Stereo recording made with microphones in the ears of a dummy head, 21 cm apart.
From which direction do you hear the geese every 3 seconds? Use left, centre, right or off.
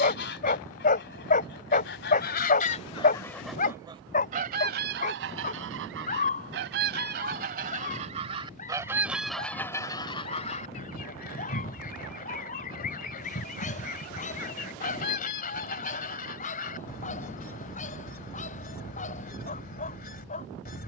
left, right, right, left, left, left, left.